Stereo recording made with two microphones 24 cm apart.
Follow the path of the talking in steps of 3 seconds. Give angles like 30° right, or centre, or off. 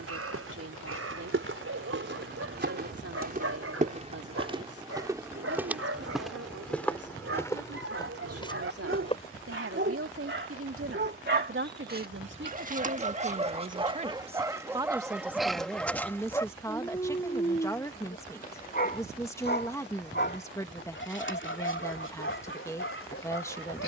80° right, 80° right, 80° right, 60° right, 40° right, 10° left, 10° left, 10° left.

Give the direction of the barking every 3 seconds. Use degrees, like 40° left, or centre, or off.
80° right, 70° right, 60° right, 50° right, 20° right, 10° left, 40° left, 60° left.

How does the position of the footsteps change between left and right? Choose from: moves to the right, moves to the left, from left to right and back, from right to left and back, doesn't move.
moves to the left.